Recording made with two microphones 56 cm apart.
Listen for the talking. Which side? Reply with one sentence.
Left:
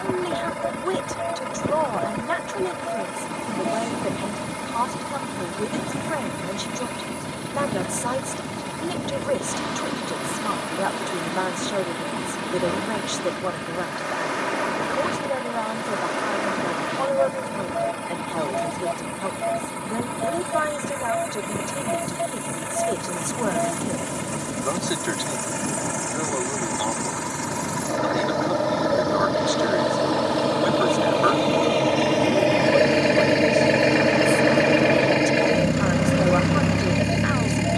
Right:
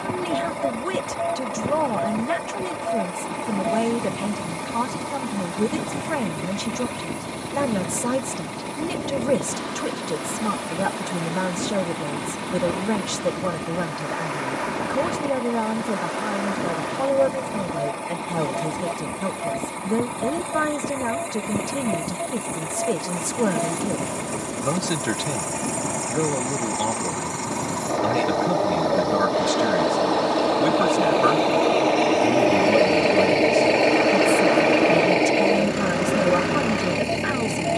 In this clip you hear the talking on the right.